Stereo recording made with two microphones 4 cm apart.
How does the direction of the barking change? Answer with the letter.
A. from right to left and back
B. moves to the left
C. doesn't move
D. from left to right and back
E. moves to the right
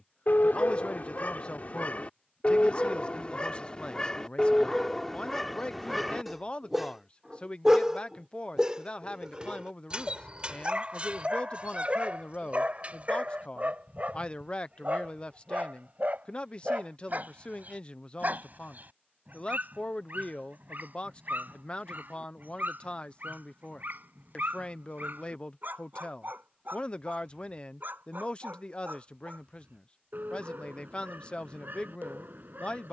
E.